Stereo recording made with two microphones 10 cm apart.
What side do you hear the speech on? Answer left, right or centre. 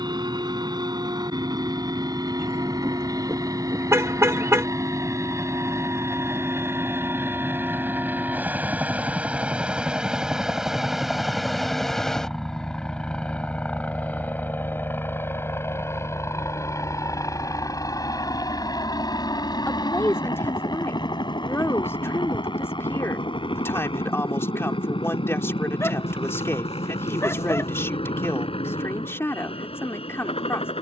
left.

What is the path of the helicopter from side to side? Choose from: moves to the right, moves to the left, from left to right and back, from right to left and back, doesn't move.
moves to the left.